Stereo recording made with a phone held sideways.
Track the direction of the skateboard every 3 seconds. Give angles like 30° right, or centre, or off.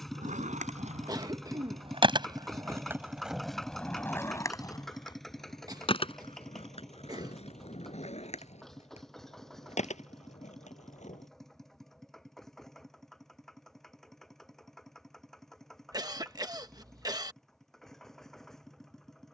50° right, 20° left, 50° left, 60° left, off, off, off.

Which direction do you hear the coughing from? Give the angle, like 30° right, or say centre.
30° right.